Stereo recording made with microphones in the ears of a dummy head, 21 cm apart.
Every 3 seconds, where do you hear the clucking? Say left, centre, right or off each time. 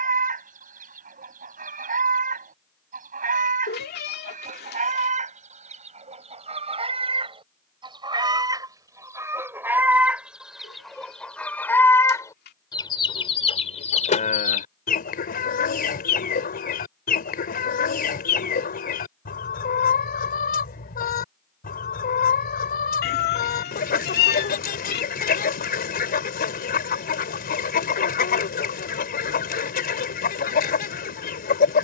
right, right, right, centre, left, left, left, left, left, left, left.